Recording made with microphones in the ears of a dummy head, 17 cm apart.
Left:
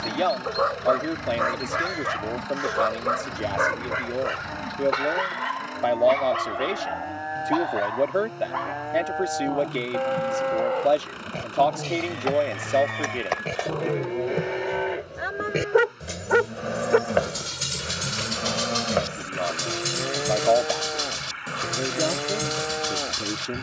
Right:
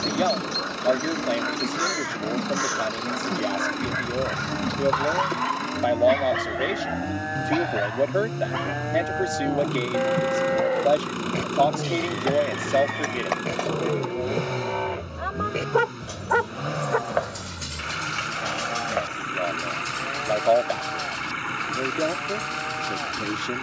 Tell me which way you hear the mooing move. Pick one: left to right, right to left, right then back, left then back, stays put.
right to left.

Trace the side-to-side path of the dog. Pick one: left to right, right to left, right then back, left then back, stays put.
right then back.